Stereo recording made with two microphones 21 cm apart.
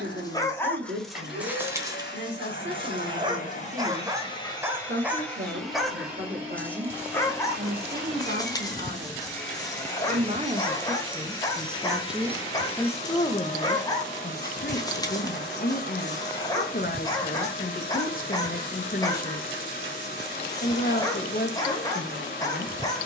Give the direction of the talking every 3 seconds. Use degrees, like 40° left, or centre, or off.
60° right, 60° right, 50° right, 30° right, 30° left, 40° left, 40° left, 40° left.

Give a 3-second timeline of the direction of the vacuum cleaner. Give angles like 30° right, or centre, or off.
50° left, 20° left, 10° right, 10° left, 40° left, 40° left, 40° left, 40° left.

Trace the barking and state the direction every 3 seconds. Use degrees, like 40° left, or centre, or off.
10° right, 10° right, 10° left, 20° left, 20° left, 20° left, 20° left, 20° left.